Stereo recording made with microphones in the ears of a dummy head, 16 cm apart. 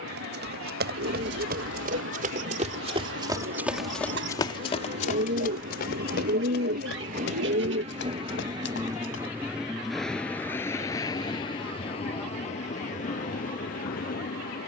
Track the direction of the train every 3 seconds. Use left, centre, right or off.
right, right, right, centre, left.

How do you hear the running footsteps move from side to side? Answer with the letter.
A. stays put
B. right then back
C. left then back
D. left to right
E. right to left
E.